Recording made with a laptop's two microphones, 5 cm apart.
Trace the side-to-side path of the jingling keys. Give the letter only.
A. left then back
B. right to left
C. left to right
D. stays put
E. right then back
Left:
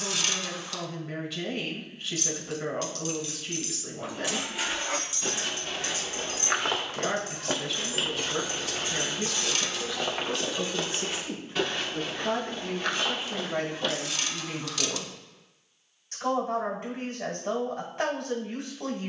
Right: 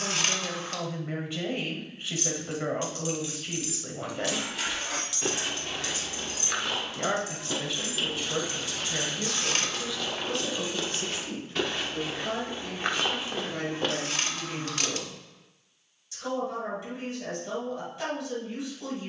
A.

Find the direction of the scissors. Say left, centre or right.
right.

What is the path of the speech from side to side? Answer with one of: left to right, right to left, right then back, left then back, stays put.
right to left.